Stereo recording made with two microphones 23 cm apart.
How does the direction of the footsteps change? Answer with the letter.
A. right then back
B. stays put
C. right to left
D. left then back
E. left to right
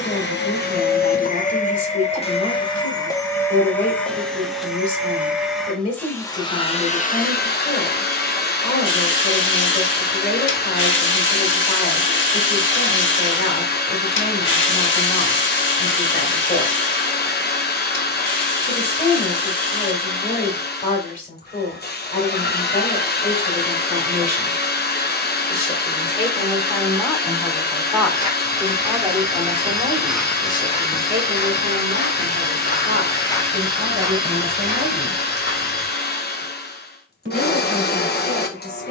D.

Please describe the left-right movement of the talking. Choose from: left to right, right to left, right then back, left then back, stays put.
left to right.